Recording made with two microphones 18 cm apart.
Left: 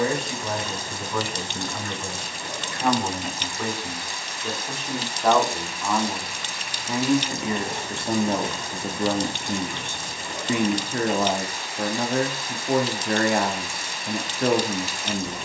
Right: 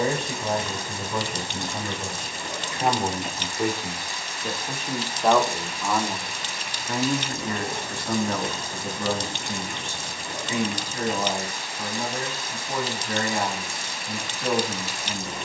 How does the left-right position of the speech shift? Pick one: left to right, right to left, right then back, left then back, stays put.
right to left.